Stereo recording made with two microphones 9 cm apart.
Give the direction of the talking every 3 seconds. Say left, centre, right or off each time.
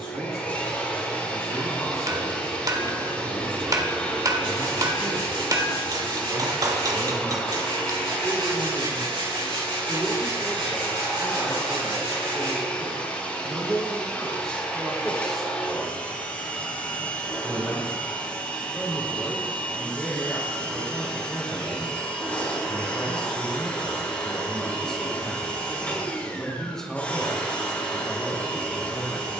right, right, right, centre, centre, centre, centre, centre, centre, centre.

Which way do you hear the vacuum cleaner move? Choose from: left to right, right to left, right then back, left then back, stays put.
stays put.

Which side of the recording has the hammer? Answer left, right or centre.
right.